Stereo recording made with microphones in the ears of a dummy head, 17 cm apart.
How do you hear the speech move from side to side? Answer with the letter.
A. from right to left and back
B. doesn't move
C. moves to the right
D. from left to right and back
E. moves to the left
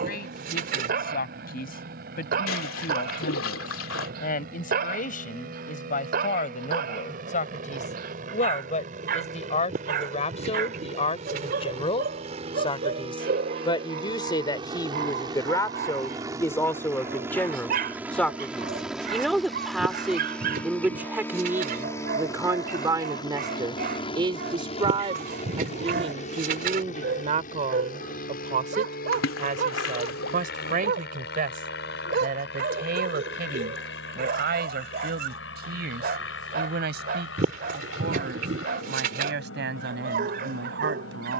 C.